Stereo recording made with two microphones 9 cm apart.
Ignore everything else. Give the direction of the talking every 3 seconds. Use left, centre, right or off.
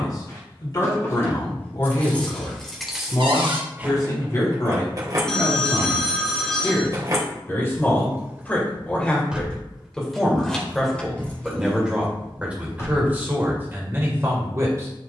left, left, left, centre, right.